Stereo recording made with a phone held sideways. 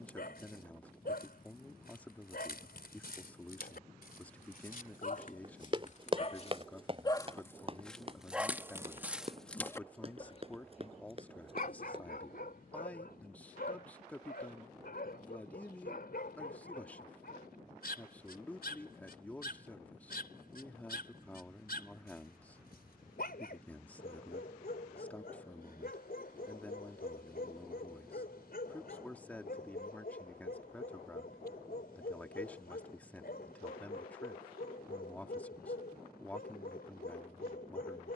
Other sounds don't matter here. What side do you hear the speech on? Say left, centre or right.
centre.